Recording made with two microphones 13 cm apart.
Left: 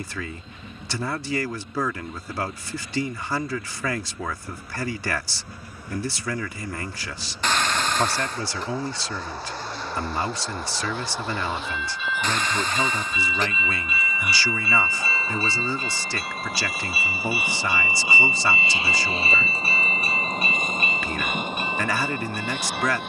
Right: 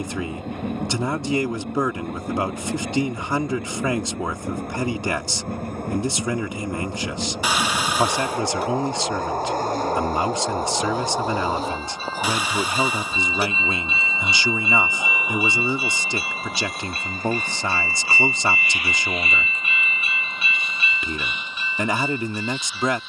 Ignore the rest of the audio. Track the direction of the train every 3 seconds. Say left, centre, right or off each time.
right, right, right, right, right, centre, left, left.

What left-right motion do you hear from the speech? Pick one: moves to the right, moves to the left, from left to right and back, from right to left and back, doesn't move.
doesn't move.